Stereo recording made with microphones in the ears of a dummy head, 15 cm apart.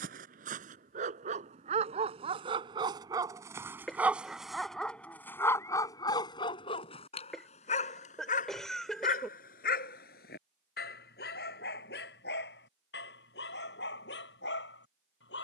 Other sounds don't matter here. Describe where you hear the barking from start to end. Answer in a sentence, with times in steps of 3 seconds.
You can hear the barking on the right from 0 s, in the centre from 3 s and on the left from 6 s.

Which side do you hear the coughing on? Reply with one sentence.
In this clip you hear the coughing in the centre.